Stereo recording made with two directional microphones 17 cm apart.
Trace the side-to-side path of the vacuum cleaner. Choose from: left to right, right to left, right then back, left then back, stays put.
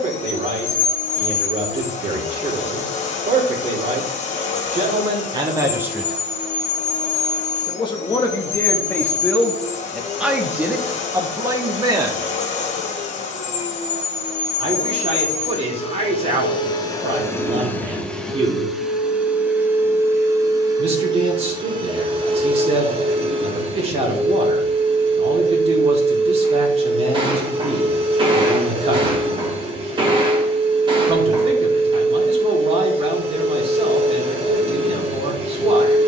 left to right.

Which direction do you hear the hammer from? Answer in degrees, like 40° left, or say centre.
30° right.